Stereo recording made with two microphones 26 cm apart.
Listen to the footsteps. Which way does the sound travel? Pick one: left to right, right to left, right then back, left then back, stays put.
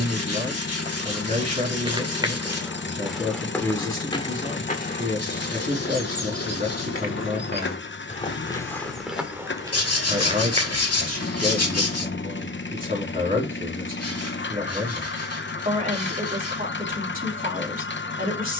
left then back.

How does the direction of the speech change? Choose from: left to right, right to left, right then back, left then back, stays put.
stays put.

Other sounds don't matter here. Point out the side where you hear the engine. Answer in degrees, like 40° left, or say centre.
40° left.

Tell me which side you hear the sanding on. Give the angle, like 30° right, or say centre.
70° left.